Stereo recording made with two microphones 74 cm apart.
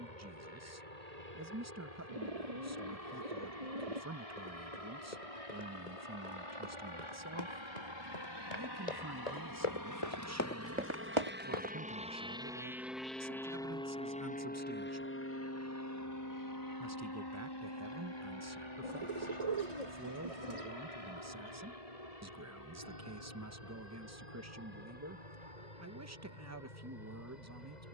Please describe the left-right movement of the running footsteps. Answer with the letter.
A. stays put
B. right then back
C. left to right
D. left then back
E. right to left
C.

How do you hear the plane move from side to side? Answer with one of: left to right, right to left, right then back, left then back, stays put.
right to left.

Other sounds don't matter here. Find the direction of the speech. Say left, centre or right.
right.